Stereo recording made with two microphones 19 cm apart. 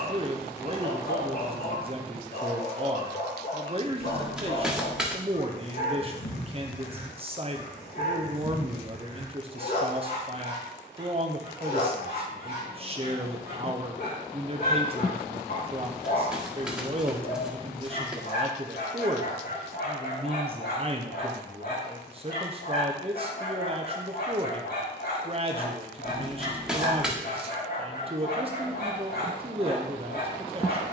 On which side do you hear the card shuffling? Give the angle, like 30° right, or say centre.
centre.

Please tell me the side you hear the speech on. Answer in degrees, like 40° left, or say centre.
30° right.